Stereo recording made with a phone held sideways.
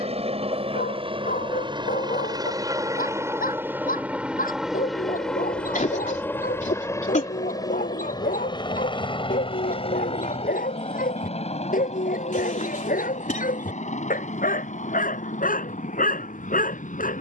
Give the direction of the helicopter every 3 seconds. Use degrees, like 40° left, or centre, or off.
40° right, 10° right, 20° left, 40° left, 50° left, 60° left.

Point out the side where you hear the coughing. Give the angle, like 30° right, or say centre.
60° left.